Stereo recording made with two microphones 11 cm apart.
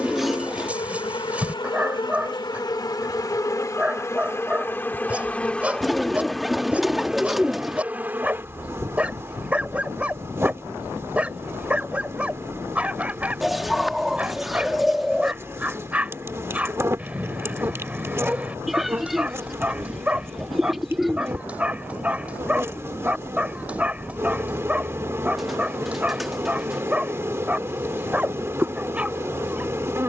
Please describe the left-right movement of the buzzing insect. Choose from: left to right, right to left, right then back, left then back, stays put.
left to right.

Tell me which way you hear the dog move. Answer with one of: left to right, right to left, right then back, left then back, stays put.
stays put.